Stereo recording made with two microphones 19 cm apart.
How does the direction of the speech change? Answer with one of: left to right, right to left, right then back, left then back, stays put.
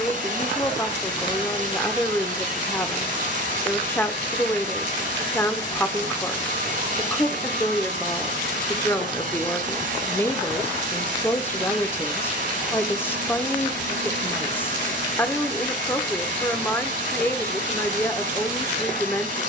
stays put.